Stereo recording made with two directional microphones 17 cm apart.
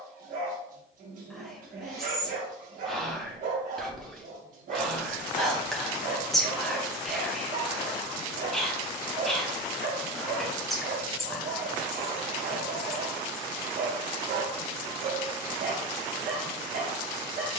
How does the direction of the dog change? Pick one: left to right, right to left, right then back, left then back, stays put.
stays put.